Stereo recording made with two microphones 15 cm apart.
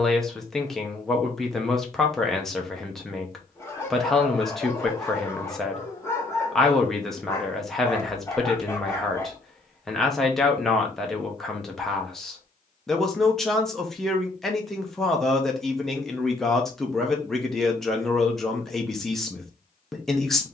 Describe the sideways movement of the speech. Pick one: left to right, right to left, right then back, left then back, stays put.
stays put.